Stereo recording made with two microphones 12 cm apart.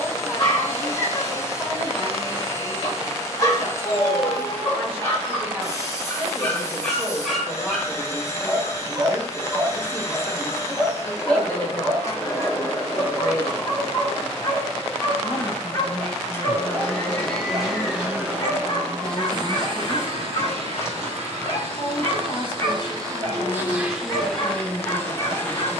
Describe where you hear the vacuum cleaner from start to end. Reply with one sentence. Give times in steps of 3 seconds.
In this clip you hear the vacuum cleaner on the left from 0 s, in the centre from 15 s, on the right from 18 s and in the centre from 24 s.